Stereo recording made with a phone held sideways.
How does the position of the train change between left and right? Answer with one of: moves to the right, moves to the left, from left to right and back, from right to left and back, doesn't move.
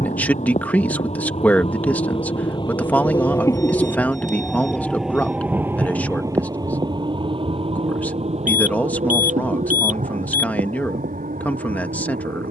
moves to the right.